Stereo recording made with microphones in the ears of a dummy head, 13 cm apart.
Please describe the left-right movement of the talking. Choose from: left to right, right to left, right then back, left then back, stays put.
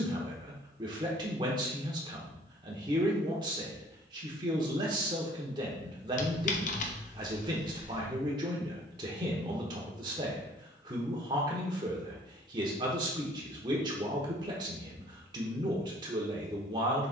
stays put.